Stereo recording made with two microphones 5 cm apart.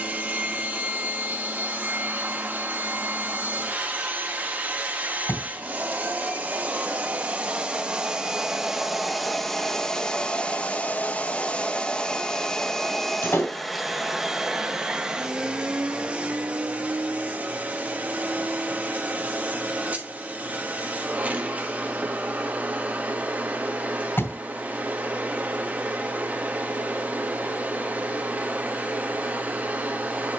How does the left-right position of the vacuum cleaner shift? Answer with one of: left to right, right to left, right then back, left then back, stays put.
left then back.